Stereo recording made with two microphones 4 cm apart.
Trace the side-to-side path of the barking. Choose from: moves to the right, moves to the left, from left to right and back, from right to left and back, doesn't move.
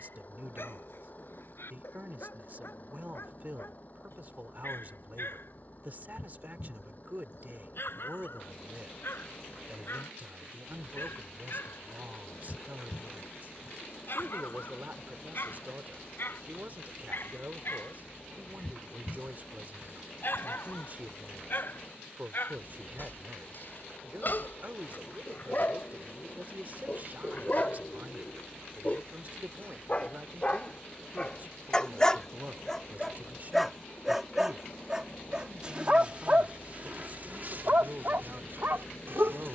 moves to the right.